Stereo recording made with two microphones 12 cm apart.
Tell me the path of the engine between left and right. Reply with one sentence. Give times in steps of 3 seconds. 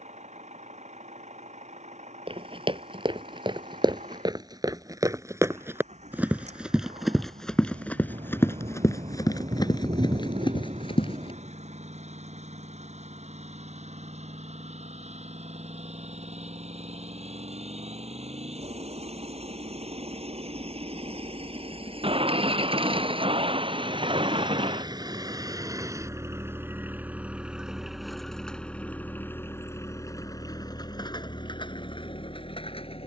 In this clip you hear the engine on the right from 0 s, in the centre from 27 s and on the left from 30 s.